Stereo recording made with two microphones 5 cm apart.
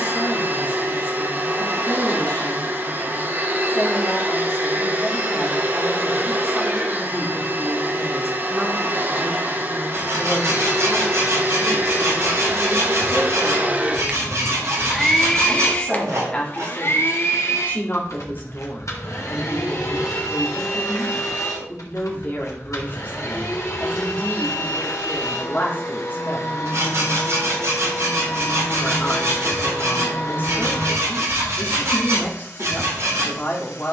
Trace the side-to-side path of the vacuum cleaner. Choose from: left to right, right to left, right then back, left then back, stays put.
right to left.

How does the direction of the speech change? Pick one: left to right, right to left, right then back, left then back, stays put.
right then back.